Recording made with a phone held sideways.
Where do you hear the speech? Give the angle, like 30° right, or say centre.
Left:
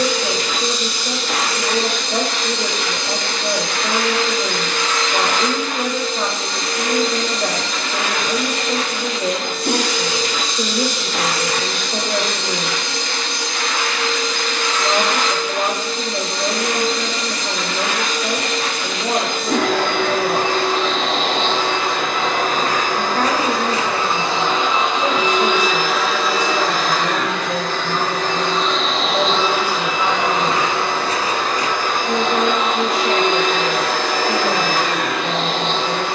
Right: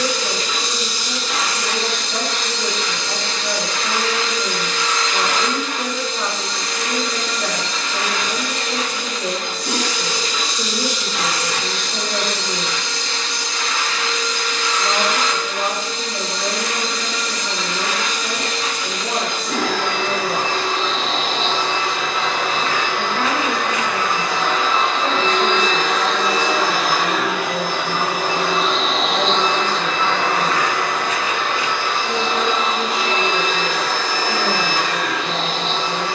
40° left.